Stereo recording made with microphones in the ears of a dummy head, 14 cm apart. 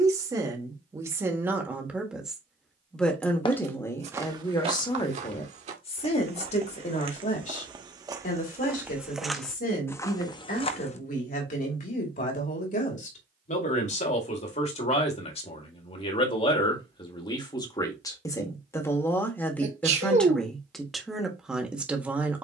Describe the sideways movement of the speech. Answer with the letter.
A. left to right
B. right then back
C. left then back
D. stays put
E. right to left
C.